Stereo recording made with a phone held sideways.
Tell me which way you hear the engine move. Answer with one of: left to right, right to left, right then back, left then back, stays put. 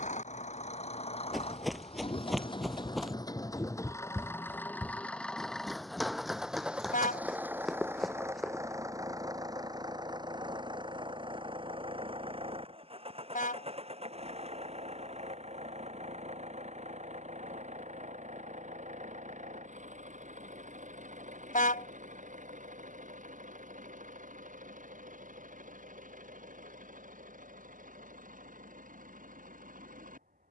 left to right.